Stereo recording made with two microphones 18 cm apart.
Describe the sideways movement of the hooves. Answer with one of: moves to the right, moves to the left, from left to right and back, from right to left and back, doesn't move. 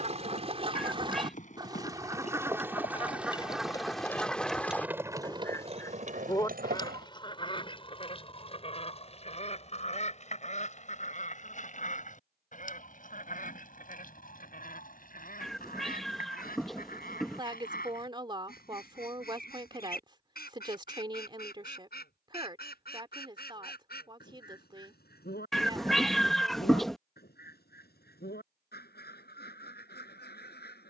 moves to the right.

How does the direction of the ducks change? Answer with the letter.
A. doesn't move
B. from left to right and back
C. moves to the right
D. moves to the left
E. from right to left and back
D.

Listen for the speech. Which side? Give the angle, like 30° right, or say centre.
30° right.